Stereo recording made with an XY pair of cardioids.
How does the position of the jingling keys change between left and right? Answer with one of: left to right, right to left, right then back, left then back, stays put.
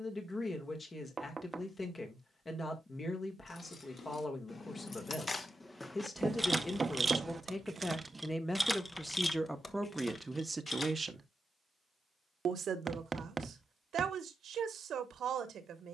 right then back.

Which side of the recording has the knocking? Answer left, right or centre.
right.